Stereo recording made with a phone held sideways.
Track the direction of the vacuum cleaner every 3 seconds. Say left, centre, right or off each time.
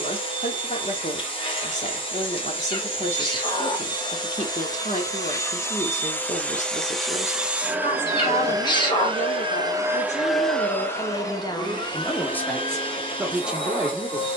left, left, centre, centre, left.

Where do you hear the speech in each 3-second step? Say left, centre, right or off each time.
left, left, left, left, centre.